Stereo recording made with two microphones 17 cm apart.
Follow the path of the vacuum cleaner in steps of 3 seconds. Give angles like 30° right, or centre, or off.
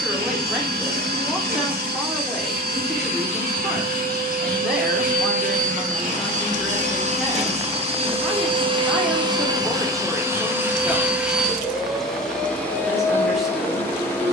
60° right, 60° right, 40° right, 10° right, 10° left.